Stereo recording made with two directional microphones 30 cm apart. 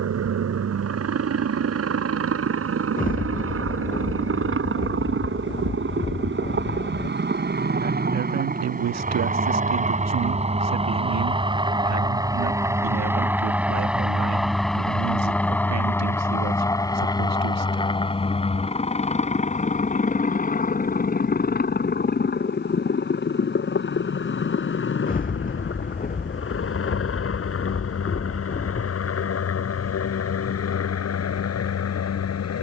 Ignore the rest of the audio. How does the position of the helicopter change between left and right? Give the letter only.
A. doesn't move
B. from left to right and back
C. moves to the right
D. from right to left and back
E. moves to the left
E.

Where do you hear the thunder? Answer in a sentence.
In this clip you hear the thunder on the left.